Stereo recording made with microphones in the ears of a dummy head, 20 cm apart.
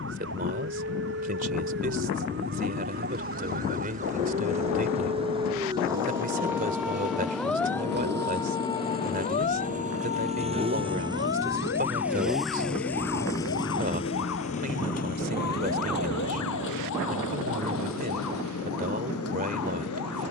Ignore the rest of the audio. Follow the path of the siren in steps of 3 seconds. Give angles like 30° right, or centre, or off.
50° right, 30° right, centre, 40° left, 60° left, 70° left, 80° left.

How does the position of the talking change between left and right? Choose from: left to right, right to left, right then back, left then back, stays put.
stays put.